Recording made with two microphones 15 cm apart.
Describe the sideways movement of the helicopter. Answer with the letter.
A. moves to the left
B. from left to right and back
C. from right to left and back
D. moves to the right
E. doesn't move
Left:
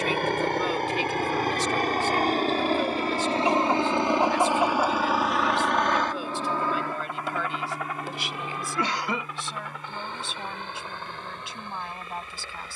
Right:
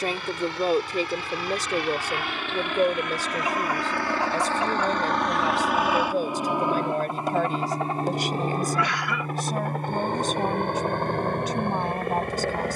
D.